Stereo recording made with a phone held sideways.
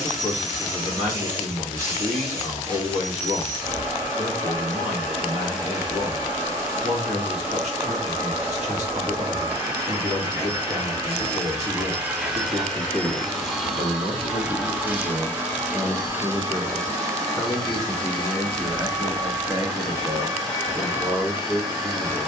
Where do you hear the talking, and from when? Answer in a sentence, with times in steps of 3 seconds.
You can hear the talking on the right from 0 s, in the centre from 15 s and on the right from 18 s.